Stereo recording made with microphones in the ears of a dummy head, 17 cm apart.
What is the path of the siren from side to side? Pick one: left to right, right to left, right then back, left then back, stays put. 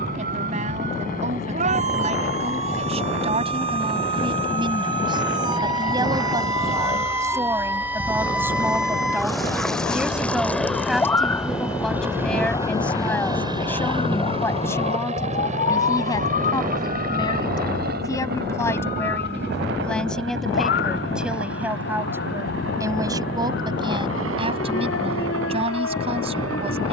right to left.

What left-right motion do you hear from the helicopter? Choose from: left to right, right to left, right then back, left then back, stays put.
left to right.